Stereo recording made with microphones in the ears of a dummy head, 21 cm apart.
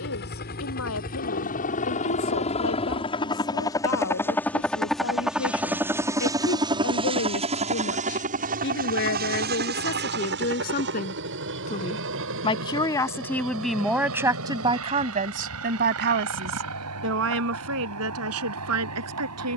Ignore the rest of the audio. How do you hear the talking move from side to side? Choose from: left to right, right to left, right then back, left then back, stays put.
left to right.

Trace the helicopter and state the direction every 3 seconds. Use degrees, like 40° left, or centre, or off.
40° left, 10° left, 30° right, 50° right, 60° right, 70° right, 70° right.